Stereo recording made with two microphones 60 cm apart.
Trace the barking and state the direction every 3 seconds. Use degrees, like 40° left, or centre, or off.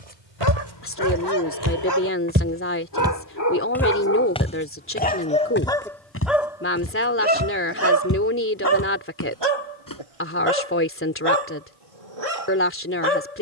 40° left, 20° left, 20° right, 50° right, 70° right.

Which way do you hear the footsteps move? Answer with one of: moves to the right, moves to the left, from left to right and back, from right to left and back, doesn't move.
moves to the left.